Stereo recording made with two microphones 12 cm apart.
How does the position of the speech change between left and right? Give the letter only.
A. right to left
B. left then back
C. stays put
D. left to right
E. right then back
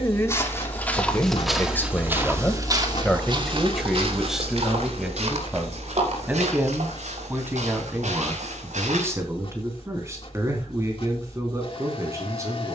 D.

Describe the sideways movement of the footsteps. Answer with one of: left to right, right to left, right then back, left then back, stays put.
left to right.